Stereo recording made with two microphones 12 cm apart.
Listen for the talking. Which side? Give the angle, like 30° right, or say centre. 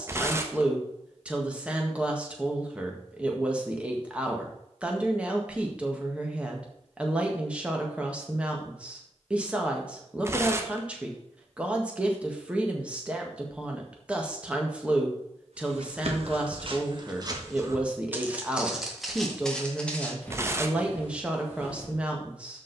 10° right.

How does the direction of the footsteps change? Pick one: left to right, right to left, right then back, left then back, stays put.
right to left.